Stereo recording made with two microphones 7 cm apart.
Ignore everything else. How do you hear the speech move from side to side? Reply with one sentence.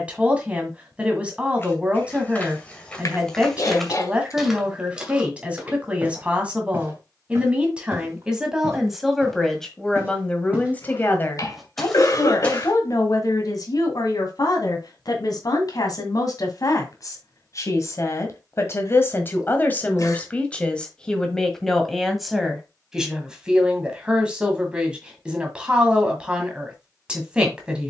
In this clip you hear the speech move from right to left and back again.